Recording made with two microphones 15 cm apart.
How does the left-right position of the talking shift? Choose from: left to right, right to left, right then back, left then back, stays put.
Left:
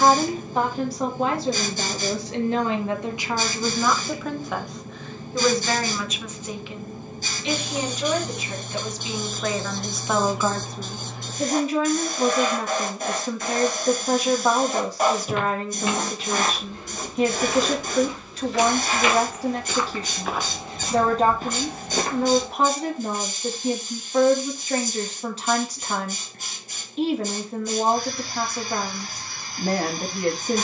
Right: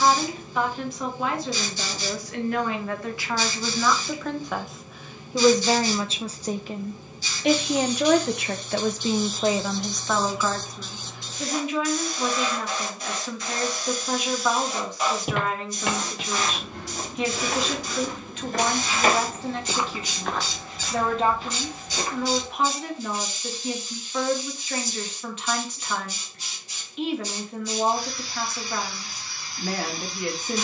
right then back.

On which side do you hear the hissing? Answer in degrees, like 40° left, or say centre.
50° left.